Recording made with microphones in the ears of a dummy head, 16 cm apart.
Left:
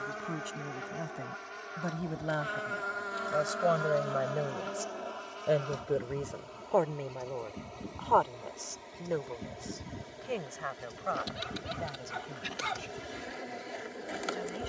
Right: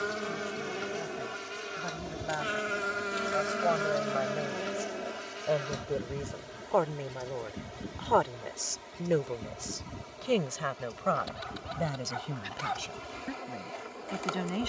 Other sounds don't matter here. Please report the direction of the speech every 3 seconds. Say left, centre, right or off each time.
left, left, centre, right, right.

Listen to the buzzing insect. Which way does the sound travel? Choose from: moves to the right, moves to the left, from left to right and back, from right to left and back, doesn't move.
moves to the left.